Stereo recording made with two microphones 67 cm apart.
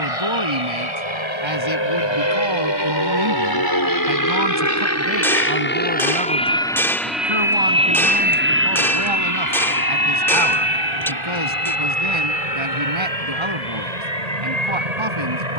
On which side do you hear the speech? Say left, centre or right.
right.